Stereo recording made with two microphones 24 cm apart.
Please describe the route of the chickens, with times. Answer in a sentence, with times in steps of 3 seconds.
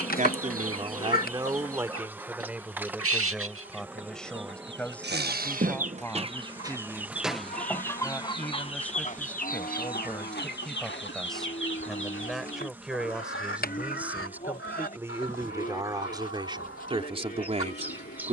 You can hear the chickens on the right from 0 s, in the centre from 6 s and on the left from 9 s.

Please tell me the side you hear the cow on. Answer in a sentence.
You can hear the cow on the left.